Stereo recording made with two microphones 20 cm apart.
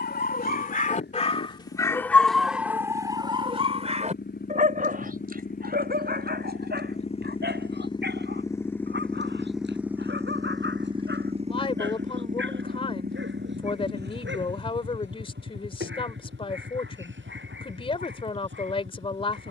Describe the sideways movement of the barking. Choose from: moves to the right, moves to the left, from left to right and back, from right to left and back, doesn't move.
moves to the right.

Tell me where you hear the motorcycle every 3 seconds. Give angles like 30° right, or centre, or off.
60° left, 50° left, 30° left, 20° right, 50° right, 70° right, 80° right.